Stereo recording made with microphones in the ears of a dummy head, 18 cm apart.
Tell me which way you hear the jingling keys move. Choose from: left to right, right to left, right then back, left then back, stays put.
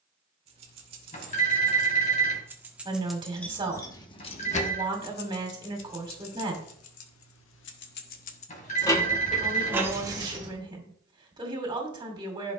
left then back.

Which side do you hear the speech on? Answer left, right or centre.
right.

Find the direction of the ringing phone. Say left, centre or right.
left.